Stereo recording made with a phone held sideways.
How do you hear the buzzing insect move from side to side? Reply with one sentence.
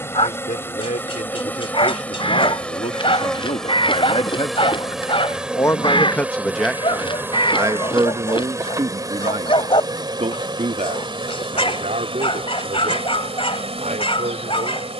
In this clip you hear the buzzing insect move from left to right.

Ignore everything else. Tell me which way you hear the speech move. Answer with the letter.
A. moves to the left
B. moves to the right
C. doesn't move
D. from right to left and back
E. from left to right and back
B.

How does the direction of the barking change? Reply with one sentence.
You can hear the barking stay in one place.